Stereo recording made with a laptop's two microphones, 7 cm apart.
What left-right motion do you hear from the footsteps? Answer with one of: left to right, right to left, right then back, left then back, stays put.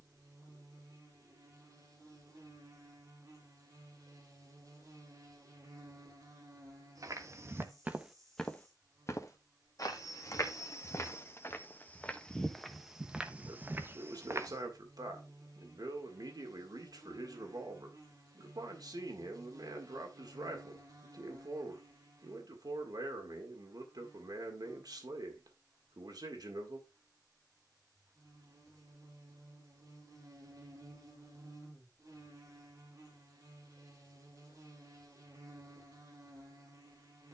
left then back.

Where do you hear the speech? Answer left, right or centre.
right.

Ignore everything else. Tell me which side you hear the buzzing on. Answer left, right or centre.
right.